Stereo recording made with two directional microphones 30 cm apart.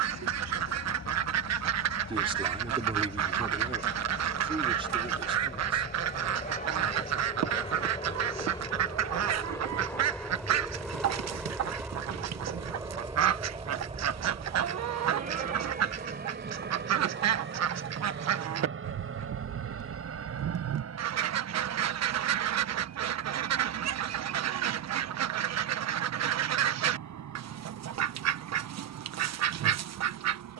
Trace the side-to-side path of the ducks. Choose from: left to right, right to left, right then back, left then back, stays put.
stays put.